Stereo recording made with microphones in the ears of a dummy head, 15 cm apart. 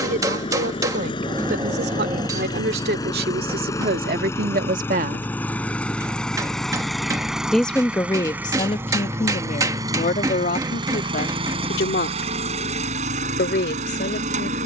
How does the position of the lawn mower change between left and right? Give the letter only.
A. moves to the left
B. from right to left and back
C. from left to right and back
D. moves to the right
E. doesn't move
D.